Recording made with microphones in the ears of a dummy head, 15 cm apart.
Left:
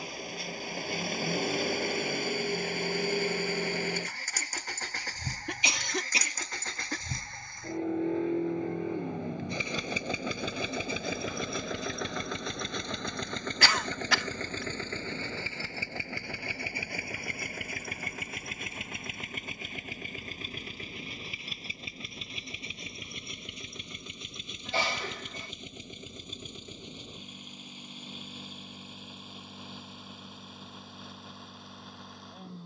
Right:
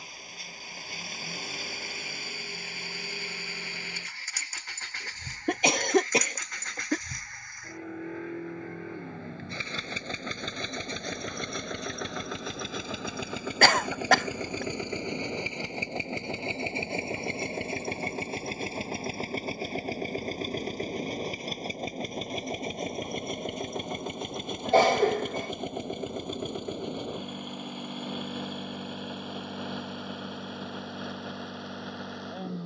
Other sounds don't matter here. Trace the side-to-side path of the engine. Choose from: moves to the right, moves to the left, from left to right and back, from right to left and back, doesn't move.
moves to the right.